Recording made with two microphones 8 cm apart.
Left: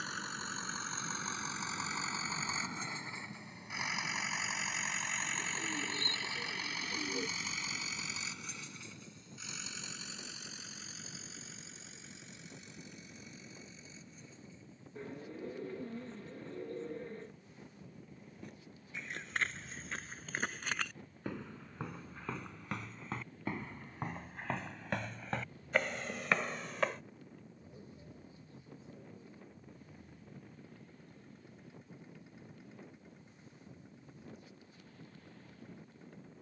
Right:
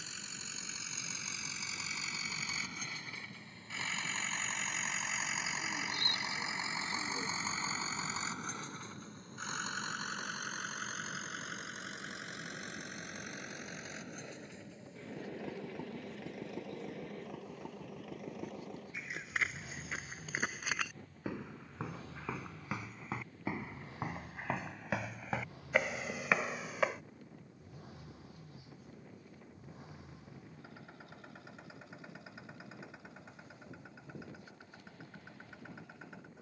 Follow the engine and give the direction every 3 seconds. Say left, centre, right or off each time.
left, centre, right, right, right, right, right, right, right, right, right, right.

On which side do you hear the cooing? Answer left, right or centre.
left.